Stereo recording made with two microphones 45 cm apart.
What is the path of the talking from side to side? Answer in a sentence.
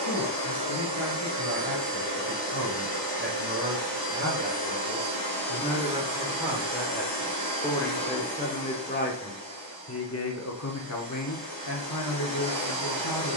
In this clip you hear the talking move to the left.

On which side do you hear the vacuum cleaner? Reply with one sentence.
In this clip you hear the vacuum cleaner on the right.